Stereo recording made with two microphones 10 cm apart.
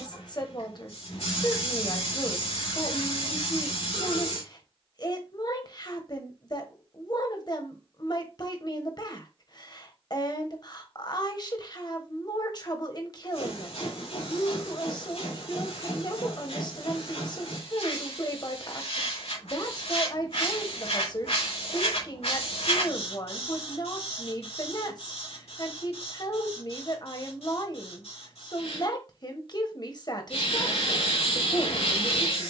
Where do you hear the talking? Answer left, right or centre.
left.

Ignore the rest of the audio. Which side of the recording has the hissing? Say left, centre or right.
left.